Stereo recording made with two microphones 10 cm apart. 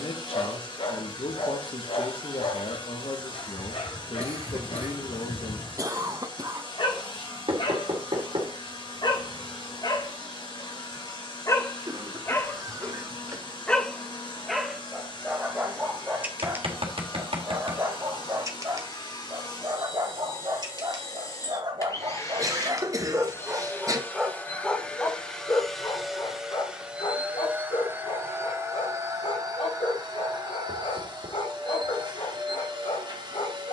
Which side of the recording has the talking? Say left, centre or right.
left.